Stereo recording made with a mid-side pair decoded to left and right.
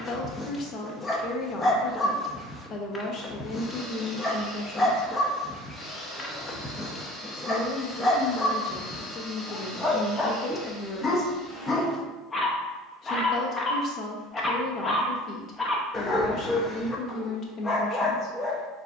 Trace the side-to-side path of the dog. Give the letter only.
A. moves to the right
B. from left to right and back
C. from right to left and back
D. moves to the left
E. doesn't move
E.